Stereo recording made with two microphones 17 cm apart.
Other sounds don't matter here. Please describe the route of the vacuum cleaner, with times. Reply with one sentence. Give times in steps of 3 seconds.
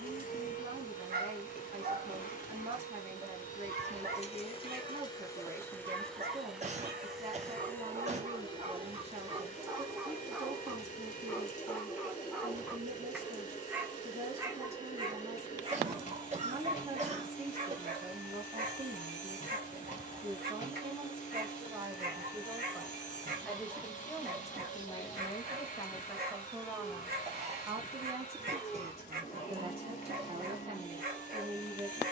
You can hear the vacuum cleaner on the left from 0 s, in the centre from 6 s and on the left from 9 s.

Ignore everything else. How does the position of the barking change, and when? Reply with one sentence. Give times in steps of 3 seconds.
In this clip you hear the barking on the right from 0 s, in the centre from 9 s and on the right from 15 s.